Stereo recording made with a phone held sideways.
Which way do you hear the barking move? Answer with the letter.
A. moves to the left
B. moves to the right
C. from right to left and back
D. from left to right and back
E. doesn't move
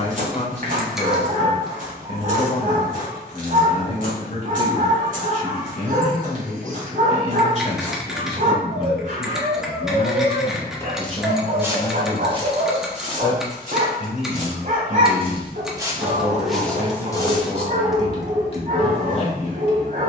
E.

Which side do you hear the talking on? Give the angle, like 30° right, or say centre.
40° left.